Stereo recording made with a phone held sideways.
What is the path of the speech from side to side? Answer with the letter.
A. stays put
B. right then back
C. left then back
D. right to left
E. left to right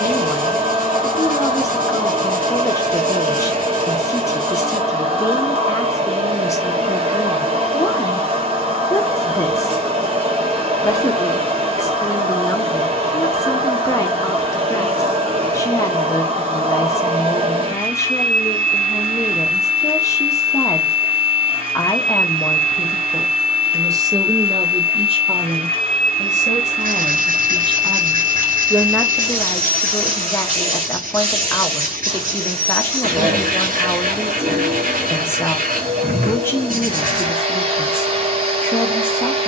B.